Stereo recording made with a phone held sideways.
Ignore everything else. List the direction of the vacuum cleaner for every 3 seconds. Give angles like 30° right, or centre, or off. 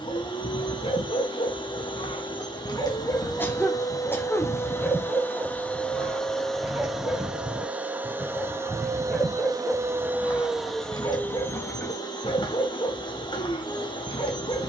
30° left, 20° left, 10° right, centre, 30° left.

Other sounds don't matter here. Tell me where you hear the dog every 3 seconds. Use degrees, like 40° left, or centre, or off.
40° left, 10° left, centre, 20° left, 40° left.